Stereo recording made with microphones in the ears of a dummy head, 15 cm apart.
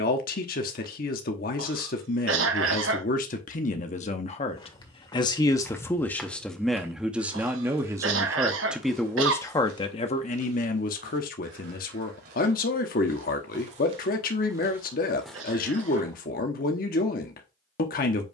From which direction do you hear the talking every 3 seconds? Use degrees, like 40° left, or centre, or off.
60° left, 40° left, 10° right, 40° left, 50° left, 50° left.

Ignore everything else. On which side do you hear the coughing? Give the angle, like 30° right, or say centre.
80° right.